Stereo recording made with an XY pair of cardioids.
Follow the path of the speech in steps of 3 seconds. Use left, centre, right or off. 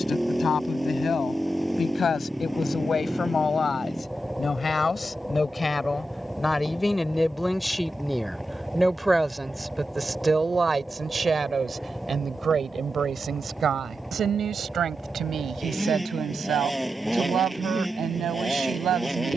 left, left, centre, right, right, right, right.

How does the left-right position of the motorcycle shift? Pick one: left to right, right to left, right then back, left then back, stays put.
stays put.